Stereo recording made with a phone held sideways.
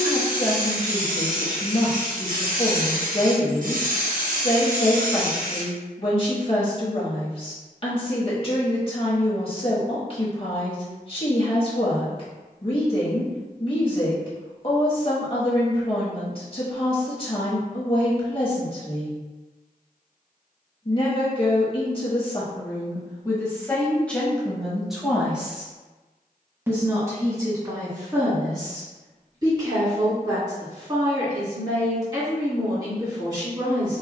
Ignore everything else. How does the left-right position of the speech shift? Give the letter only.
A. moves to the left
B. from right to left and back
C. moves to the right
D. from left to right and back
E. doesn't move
C.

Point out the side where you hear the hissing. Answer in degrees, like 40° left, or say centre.
60° right.